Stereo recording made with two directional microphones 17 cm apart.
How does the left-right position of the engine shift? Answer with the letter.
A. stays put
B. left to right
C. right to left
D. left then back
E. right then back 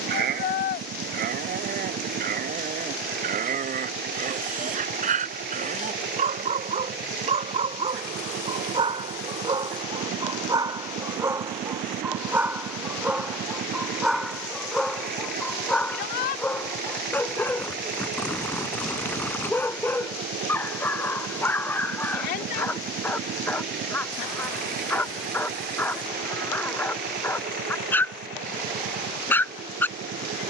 A.